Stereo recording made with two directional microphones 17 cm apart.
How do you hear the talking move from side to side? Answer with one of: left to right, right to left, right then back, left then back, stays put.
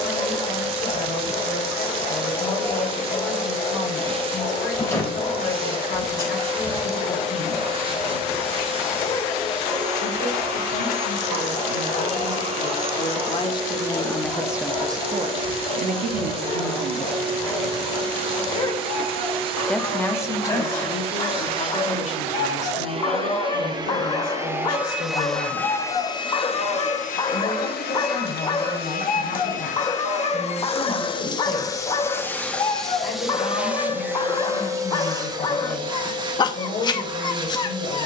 right then back.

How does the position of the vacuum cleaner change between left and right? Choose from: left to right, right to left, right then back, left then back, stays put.
left then back.